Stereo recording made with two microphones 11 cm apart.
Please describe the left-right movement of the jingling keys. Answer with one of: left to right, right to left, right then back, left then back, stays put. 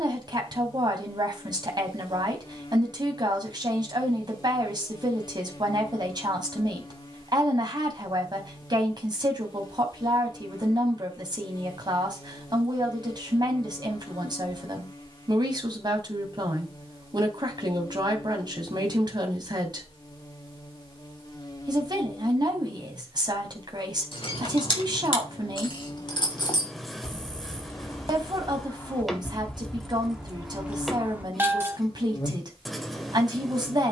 left to right.